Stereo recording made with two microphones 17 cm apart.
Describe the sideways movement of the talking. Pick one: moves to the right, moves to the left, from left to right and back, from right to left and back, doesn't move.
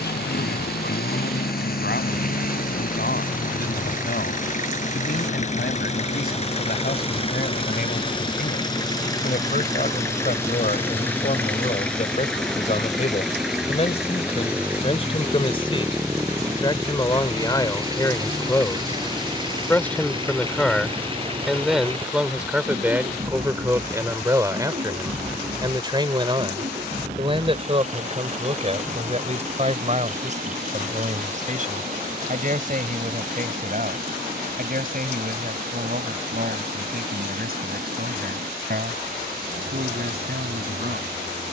moves to the right.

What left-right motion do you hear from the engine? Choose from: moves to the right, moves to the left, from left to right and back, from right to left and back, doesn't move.
moves to the right.